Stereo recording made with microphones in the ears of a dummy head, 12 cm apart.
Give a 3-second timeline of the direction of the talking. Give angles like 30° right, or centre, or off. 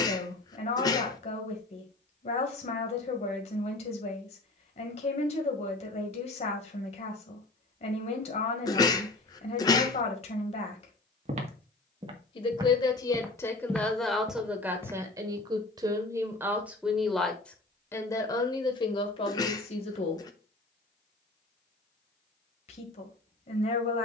50° left, 50° left, 50° left, 50° left, 10° left, 10° right, 40° left, 50° left.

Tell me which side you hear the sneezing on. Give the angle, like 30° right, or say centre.
30° left.